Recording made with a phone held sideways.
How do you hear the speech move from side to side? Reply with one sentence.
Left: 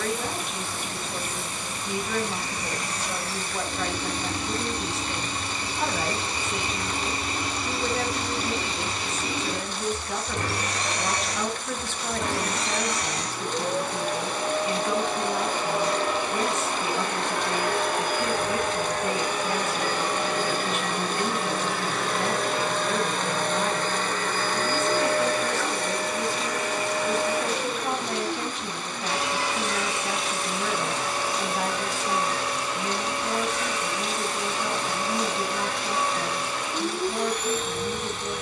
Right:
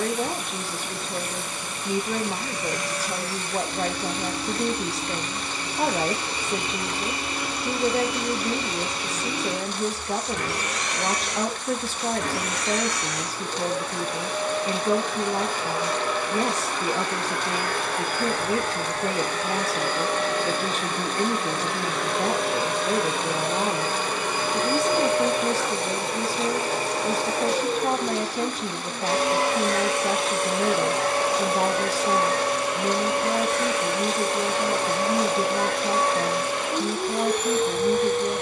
You can hear the speech stay put.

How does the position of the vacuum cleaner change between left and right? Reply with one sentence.
In this clip you hear the vacuum cleaner go from the left side to the right.